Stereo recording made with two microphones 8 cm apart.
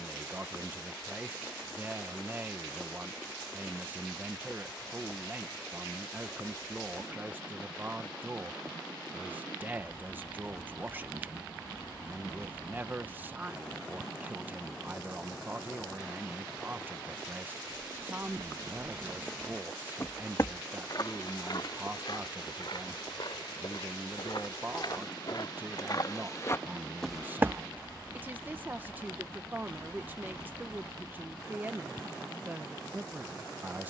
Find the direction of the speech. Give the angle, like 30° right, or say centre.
20° right.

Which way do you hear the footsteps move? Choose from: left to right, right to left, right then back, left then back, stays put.
left then back.